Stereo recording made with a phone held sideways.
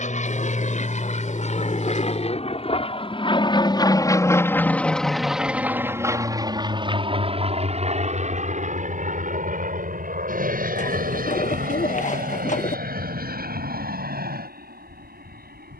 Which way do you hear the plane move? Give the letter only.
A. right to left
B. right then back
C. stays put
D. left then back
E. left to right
E.